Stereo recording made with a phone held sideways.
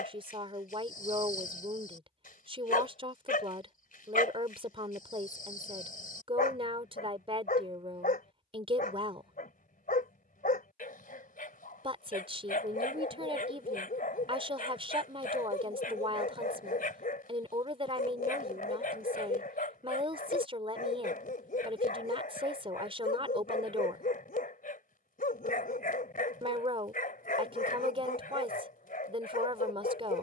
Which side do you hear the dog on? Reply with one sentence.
In this clip you hear the dog on the left.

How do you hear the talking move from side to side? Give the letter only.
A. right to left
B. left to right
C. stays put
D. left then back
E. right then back
C.